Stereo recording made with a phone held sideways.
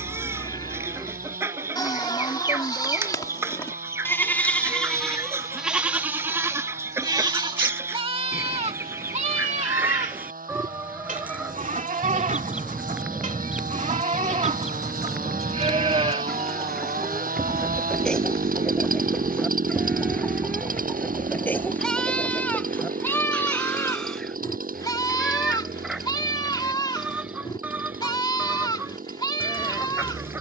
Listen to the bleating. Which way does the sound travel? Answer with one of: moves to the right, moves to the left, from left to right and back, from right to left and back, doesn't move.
from left to right and back.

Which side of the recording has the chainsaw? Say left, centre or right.
right.